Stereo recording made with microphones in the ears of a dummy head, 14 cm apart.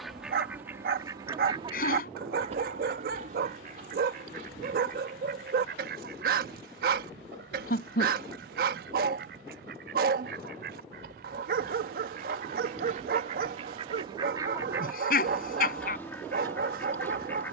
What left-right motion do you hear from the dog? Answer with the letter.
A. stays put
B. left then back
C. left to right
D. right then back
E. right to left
A.